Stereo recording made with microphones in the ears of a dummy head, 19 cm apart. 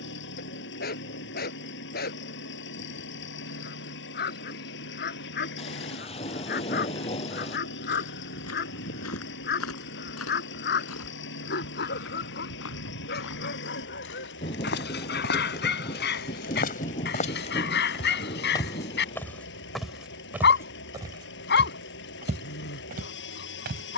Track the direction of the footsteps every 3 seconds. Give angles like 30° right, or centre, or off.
off, off, 70° left, 70° left, 60° left, 40° left, centre, 30° right.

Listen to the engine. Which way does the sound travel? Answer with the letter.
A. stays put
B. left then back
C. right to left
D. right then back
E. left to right
A.